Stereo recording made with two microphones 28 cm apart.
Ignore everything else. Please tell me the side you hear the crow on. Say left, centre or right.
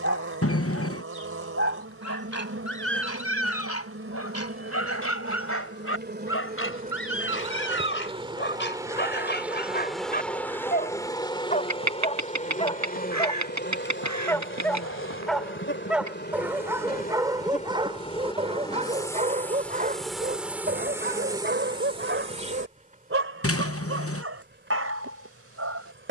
right.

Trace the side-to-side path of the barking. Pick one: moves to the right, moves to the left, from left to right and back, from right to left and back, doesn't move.
moves to the right.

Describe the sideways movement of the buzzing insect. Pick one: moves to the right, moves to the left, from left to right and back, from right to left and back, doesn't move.
from right to left and back.